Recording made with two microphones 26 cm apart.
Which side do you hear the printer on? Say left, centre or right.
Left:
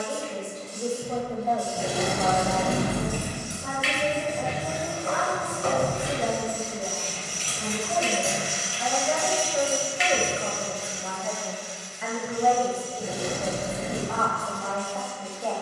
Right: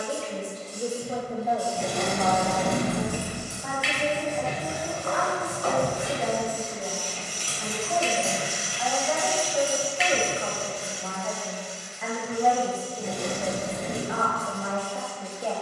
left.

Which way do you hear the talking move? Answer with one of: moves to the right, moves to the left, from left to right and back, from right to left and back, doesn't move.
from right to left and back.